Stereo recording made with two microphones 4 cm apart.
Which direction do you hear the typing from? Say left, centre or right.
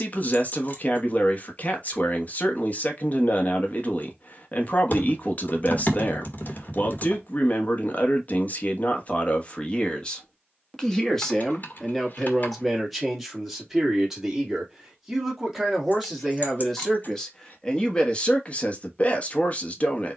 left.